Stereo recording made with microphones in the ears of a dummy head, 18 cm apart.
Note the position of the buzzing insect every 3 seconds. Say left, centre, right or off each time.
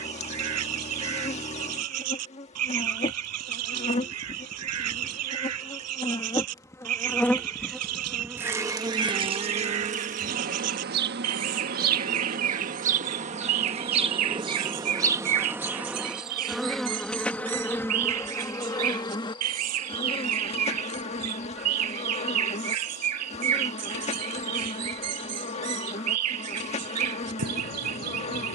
left, left, centre, right, right, centre, left, left, left, left.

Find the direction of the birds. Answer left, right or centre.
right.